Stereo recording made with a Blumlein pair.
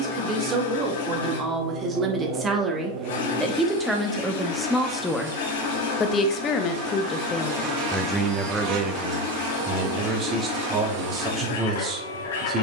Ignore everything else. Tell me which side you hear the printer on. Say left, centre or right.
left.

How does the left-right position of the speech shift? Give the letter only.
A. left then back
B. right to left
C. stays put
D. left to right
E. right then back
A.